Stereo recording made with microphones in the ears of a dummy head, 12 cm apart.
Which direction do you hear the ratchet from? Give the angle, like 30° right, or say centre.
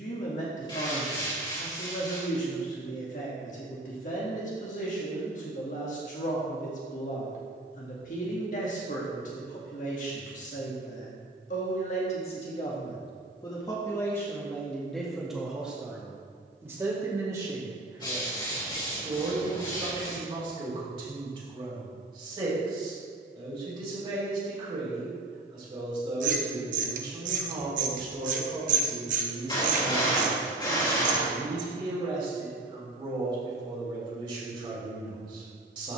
60° right.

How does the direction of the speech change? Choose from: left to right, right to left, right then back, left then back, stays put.
left to right.